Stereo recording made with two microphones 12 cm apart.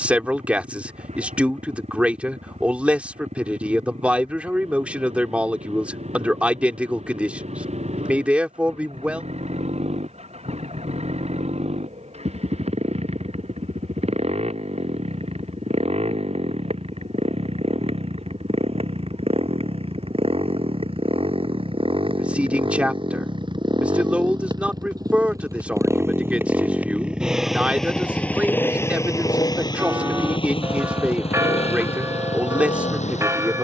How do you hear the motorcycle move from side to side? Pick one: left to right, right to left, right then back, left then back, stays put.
right to left.